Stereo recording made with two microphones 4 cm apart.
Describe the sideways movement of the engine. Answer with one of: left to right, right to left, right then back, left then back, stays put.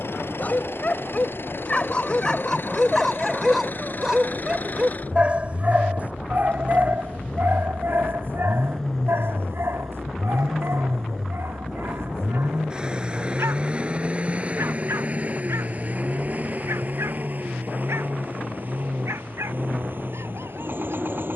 left to right.